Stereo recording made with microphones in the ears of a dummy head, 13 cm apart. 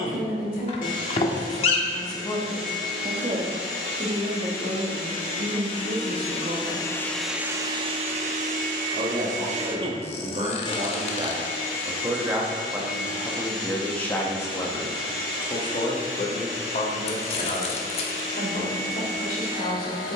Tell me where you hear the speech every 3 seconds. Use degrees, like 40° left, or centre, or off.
50° left, 50° right, 60° right, 40° right, centre, 50° left, 60° left.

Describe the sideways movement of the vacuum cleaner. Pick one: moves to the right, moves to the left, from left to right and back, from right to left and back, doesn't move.
from left to right and back.